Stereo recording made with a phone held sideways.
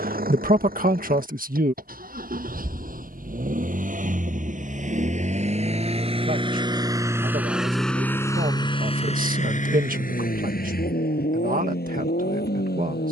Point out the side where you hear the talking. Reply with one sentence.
In this clip you hear the talking on the right.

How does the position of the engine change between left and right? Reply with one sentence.
In this clip you hear the engine move from right to left.